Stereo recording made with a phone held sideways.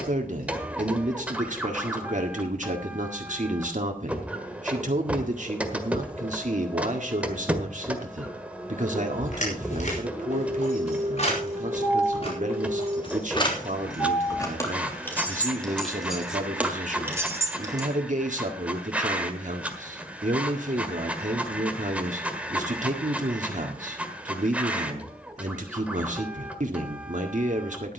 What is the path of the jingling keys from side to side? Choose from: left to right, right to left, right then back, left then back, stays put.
left to right.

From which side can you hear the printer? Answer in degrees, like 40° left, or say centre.
10° right.